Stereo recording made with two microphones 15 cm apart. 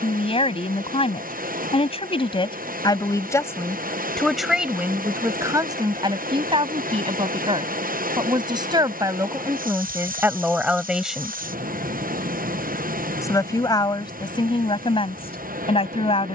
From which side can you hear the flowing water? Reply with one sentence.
You can hear the flowing water on the right.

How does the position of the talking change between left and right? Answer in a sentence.
You can hear the talking go right and come back.